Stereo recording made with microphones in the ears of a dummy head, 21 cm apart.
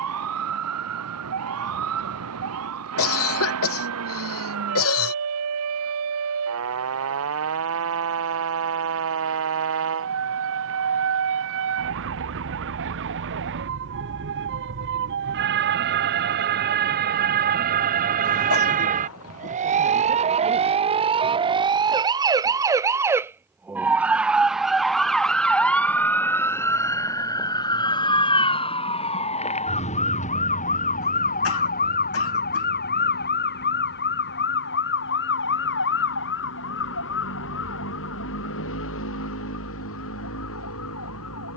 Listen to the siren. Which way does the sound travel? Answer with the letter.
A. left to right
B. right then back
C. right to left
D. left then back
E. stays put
C.